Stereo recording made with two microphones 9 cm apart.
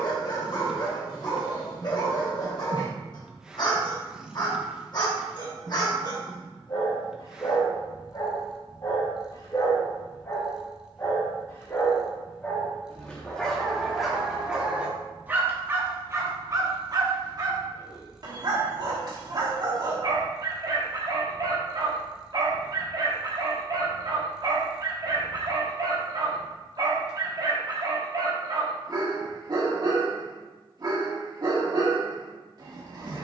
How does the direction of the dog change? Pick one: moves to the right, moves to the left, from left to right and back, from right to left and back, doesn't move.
moves to the right.